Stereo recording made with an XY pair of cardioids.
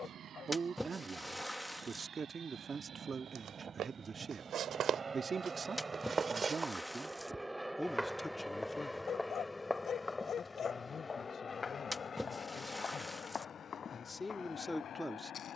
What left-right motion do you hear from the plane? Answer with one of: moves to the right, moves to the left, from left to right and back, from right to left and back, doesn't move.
moves to the left.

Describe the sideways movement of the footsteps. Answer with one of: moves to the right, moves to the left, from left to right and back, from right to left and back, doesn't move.
moves to the left.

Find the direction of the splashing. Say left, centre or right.
centre.